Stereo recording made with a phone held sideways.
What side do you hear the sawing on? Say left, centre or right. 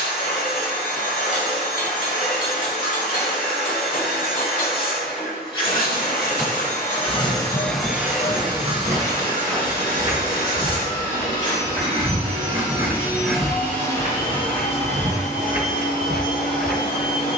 left.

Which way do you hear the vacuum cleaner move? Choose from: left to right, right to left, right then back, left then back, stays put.
right then back.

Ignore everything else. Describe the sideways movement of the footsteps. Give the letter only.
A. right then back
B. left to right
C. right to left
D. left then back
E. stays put
C.